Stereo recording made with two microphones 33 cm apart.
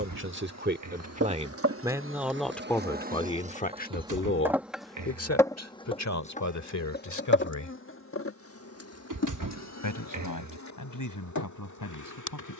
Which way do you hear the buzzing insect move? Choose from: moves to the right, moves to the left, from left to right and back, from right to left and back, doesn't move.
moves to the left.